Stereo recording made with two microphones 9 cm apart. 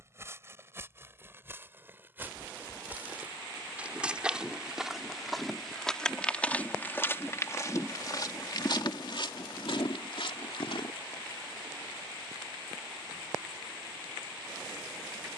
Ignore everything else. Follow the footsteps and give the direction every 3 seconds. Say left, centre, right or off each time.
right, centre, left, left, off.